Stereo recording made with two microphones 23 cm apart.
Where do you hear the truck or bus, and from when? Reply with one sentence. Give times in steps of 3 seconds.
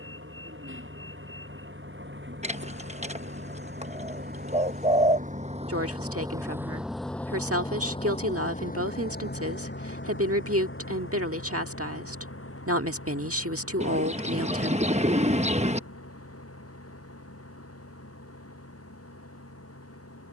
You can hear the truck or bus on the right from 0 s, in the centre from 6 s and on the left from 9 s.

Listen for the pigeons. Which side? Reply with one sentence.
You can hear the pigeons on the right.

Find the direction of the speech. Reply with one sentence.
You can hear the speech on the right.